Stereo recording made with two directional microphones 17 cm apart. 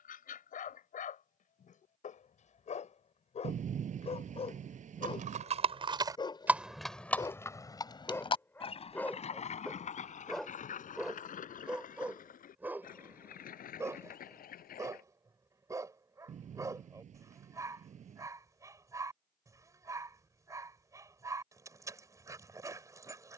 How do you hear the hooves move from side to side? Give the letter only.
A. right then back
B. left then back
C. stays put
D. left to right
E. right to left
E.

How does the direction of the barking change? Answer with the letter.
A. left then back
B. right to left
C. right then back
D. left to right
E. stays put
D.